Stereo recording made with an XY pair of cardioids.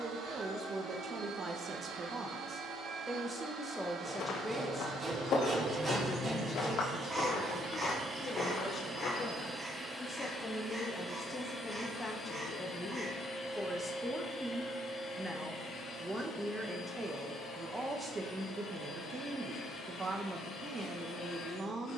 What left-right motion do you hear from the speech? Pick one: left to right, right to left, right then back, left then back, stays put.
left then back.